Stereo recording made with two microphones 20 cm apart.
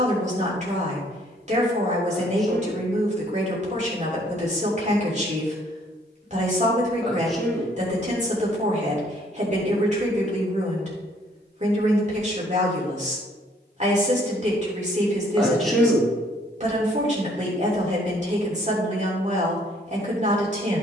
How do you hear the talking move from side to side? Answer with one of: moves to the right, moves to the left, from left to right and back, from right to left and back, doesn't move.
doesn't move.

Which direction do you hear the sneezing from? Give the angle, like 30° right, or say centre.
centre.